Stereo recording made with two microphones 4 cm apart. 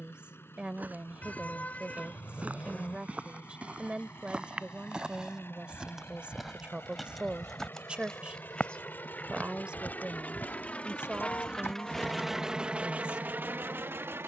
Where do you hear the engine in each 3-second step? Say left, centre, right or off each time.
left, left, left, left, right.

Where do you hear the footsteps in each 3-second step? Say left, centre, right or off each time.
right, right, centre, left, off.